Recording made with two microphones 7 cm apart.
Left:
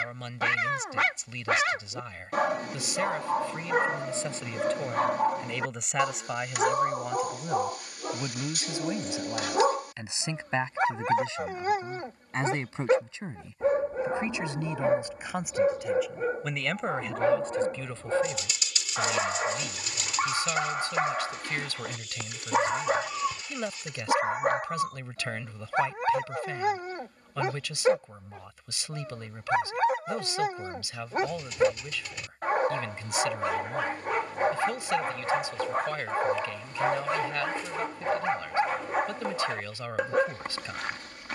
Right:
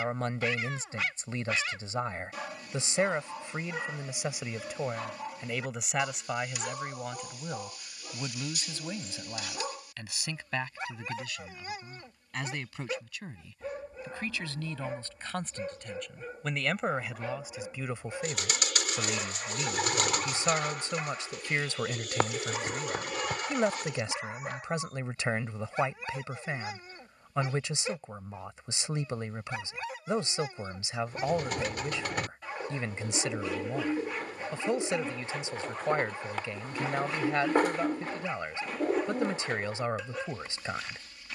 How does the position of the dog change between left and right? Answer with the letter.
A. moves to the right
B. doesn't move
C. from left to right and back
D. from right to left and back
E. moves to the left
B.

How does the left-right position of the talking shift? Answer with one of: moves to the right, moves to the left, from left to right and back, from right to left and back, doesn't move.
from right to left and back.